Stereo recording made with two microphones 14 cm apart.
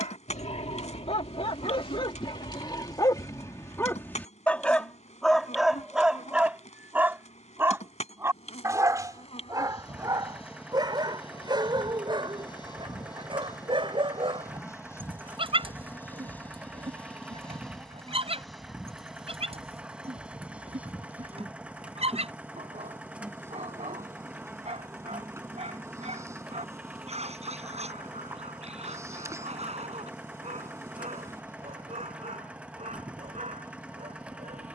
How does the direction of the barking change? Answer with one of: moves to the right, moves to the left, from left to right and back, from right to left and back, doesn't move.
moves to the right.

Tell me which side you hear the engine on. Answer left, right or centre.
centre.